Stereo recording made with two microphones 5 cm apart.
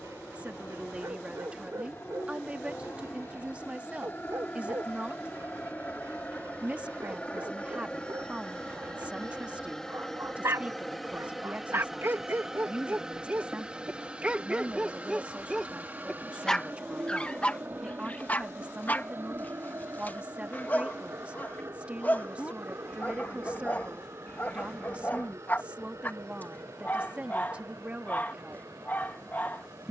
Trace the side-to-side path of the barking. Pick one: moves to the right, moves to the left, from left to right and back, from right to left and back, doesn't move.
moves to the left.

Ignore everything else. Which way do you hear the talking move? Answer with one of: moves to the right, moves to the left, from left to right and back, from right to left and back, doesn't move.
doesn't move.